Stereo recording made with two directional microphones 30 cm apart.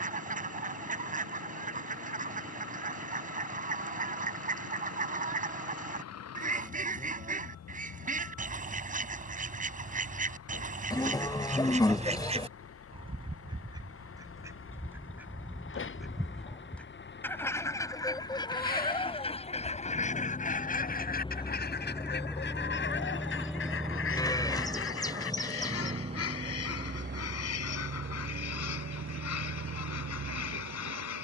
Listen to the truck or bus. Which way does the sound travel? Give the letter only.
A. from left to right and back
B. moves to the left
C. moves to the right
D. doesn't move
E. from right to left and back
C.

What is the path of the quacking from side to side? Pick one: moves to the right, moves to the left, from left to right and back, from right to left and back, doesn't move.
moves to the left.